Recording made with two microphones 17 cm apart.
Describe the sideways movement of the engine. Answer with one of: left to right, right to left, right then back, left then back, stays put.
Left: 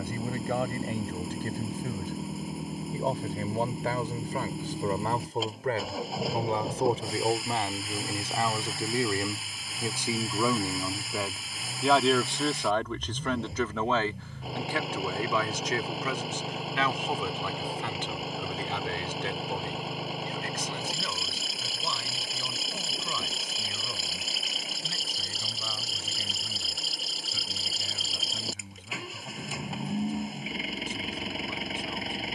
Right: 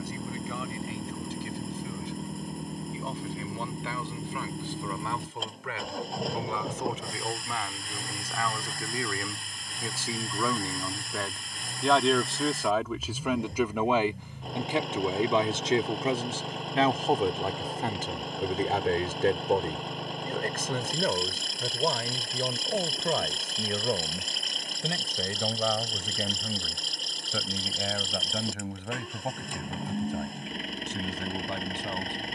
stays put.